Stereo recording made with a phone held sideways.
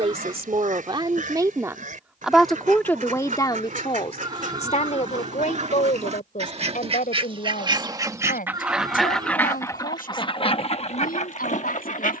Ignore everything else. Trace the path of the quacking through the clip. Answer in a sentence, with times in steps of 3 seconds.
In this clip you hear the quacking on the right from 0 s and on the left from 9 s.